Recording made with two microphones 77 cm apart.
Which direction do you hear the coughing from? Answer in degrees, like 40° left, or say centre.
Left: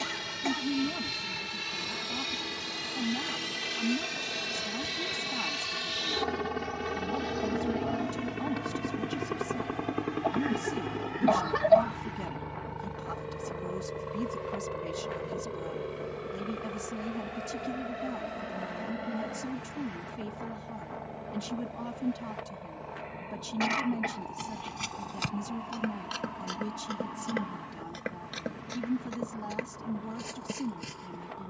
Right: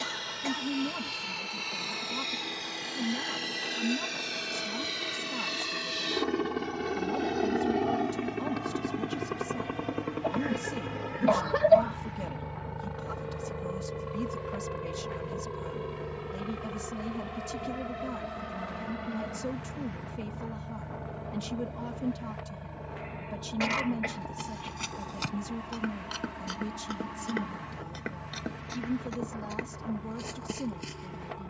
10° right.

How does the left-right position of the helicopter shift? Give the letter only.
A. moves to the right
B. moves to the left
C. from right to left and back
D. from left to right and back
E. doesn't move
A.